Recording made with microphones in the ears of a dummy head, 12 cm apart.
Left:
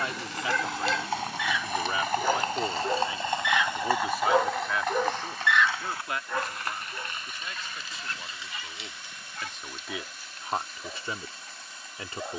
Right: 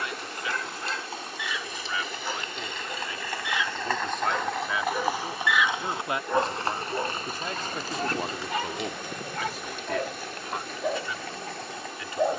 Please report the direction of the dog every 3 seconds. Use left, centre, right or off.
left, left, right, right.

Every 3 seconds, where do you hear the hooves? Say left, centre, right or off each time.
left, centre, right, right.